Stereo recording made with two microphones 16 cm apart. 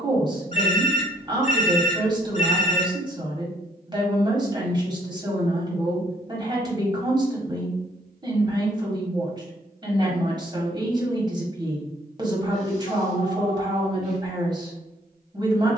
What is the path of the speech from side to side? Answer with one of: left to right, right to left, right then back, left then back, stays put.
stays put.